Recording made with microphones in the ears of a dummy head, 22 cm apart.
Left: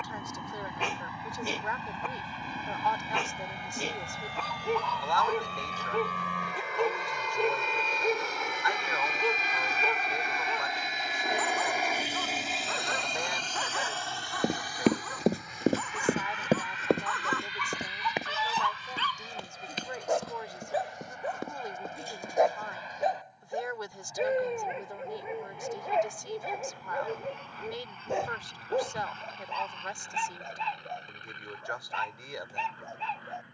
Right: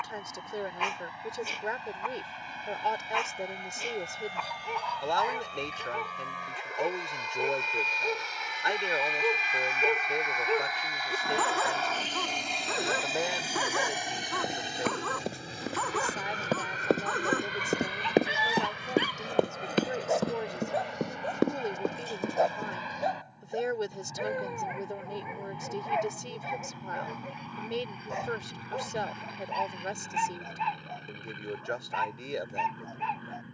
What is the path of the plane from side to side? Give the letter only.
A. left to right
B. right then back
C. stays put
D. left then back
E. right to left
A.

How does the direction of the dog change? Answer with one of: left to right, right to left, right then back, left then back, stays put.
right then back.